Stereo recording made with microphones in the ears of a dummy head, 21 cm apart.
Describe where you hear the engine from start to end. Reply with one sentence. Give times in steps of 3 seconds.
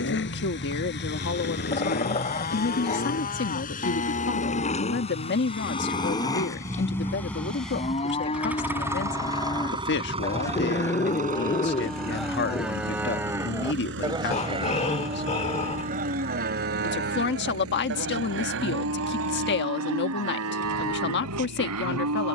In this clip you hear the engine on the left from 0 s, in the centre from 6 s and on the right from 9 s.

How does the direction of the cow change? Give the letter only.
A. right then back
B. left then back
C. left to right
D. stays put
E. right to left
C.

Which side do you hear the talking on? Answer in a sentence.
In this clip you hear the talking on the left.